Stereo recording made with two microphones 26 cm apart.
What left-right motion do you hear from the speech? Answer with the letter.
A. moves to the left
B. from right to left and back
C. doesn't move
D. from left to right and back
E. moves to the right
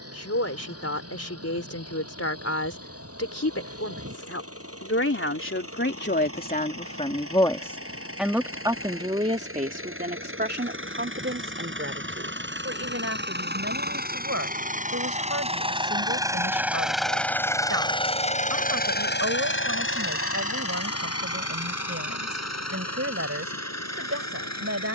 E.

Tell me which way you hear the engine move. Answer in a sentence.
In this clip you hear the engine move to the left.